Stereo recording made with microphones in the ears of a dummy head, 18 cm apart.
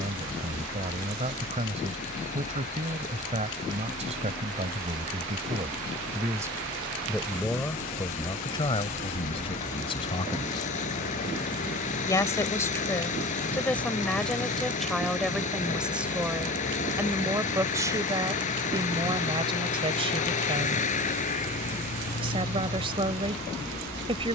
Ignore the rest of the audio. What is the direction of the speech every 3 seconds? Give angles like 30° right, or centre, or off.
30° right, 30° right, 10° left, 30° left, 10° left, 10° right, 20° right, 30° right.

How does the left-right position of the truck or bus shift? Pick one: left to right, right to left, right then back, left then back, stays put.
stays put.